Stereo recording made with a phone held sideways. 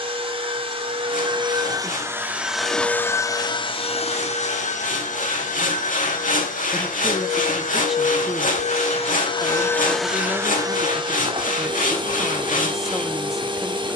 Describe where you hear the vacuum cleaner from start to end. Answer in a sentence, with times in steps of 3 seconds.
In this clip you hear the vacuum cleaner on the right from 0 s, on the left from 3 s, in the centre from 9 s and on the right from 12 s.